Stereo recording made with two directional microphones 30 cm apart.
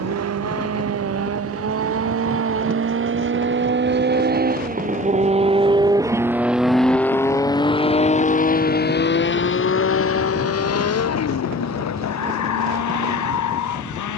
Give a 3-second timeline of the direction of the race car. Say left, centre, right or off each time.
right, right, centre, left, left.